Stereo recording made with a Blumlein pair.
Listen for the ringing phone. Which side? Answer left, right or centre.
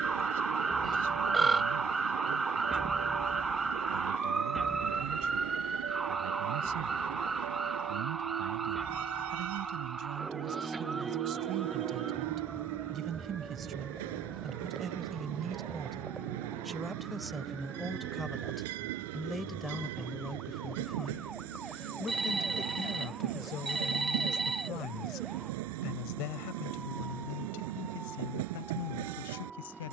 centre.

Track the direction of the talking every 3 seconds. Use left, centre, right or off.
right, right, right, right, right, centre, centre, left, left, left.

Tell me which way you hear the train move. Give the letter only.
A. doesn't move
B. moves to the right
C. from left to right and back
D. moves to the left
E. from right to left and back
A.